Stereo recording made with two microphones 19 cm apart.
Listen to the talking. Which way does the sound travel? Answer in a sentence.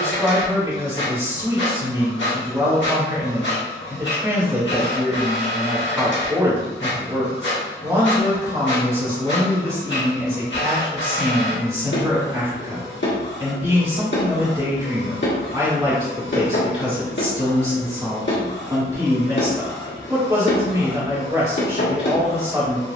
In this clip you hear the talking stay in one place.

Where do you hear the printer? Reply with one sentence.
You can hear the printer on the left.